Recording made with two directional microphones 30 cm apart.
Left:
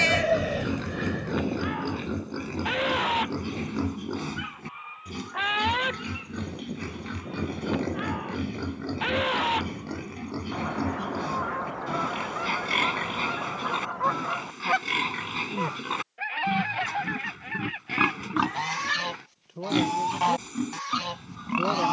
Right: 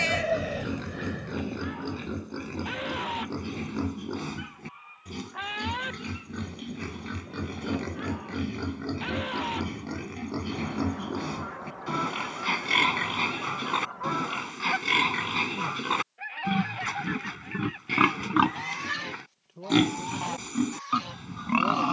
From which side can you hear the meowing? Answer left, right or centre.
left.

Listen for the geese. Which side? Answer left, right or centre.
left.